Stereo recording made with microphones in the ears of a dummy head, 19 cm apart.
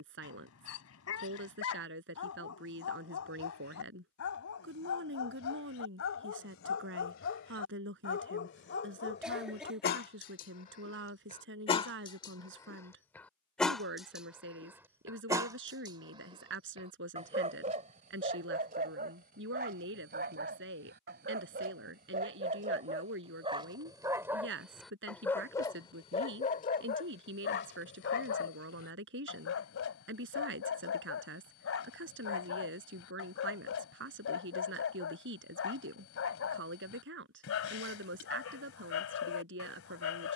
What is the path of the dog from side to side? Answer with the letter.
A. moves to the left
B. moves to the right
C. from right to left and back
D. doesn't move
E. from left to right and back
E.